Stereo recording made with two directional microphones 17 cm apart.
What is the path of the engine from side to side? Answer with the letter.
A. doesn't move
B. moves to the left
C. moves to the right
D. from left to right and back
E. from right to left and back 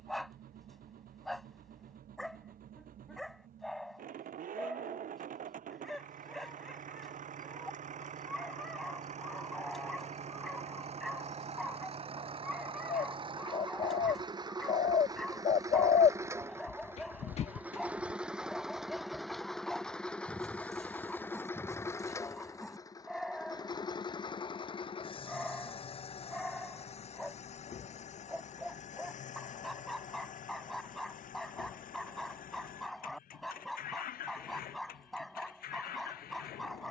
B.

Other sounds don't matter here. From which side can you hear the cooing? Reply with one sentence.
In this clip you hear the cooing on the left.